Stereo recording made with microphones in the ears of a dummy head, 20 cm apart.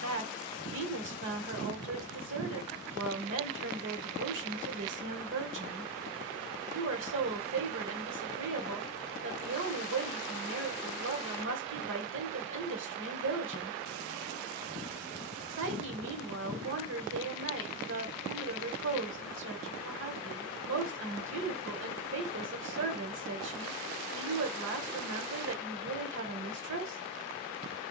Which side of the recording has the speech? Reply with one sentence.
You can hear the speech on the right.